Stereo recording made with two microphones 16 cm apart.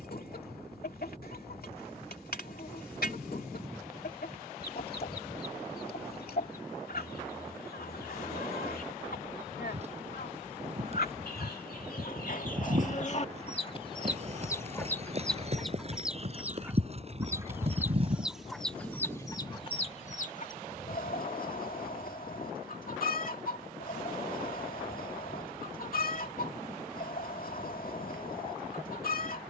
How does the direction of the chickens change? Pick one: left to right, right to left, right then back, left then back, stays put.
right then back.